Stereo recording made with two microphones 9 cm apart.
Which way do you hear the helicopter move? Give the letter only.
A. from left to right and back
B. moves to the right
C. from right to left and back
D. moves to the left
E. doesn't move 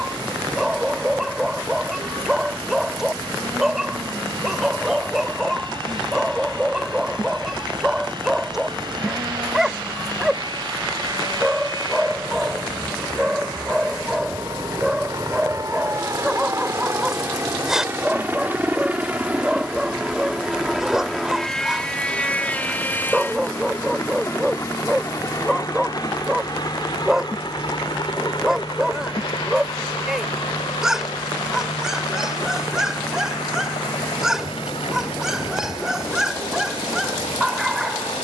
D.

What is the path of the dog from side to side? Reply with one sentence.
In this clip you hear the dog stay in one place.